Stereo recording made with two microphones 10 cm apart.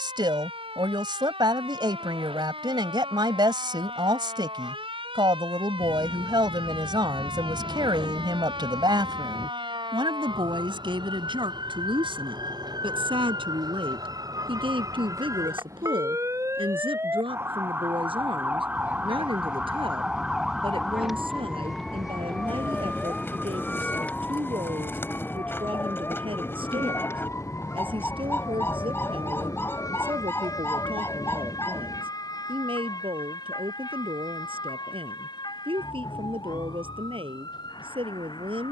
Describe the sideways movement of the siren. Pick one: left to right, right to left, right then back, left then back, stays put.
right to left.